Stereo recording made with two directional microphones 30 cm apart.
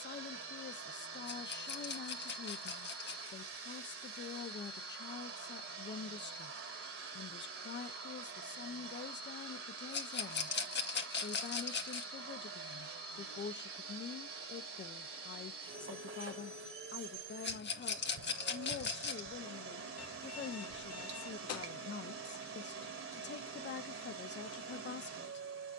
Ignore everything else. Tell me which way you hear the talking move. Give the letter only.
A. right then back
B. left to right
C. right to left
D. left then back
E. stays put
E.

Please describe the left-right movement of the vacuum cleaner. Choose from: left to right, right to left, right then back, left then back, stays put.
stays put.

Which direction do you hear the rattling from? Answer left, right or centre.
left.